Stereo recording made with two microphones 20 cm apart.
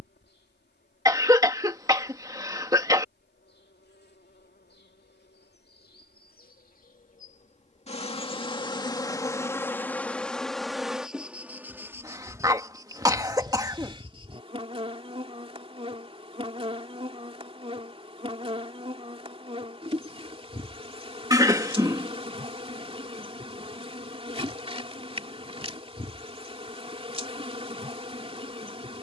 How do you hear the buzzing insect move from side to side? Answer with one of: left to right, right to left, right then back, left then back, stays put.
left to right.